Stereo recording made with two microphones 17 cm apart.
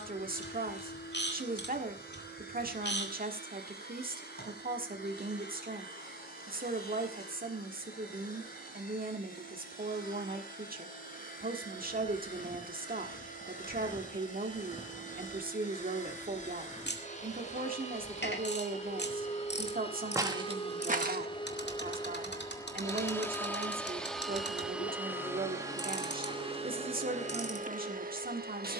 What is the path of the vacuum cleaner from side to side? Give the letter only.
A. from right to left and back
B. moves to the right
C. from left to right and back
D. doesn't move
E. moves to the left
B.